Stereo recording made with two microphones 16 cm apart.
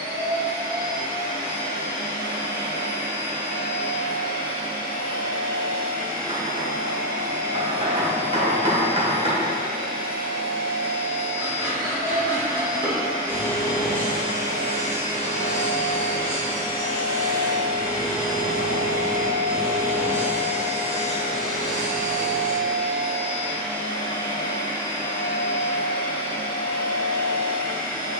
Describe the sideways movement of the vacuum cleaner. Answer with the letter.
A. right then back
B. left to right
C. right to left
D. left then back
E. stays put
C.